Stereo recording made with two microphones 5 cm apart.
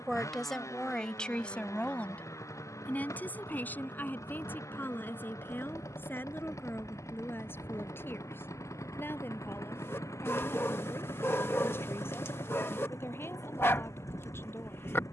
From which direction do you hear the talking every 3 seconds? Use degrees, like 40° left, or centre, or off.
20° left, 40° left, 40° left, 50° left, 50° left.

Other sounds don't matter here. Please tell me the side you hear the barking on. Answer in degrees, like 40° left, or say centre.
50° left.